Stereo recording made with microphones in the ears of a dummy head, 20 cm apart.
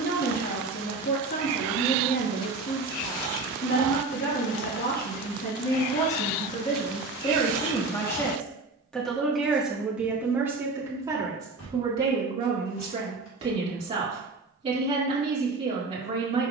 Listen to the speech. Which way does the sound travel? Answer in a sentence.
You can hear the speech travel towards the right.